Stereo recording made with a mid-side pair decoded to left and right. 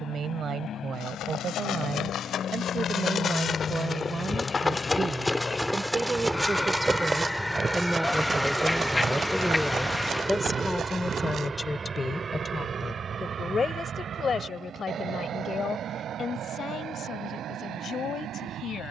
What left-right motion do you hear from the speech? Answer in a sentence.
You can hear the speech travel towards the left.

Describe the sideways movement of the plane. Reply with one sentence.
In this clip you hear the plane move from left to right.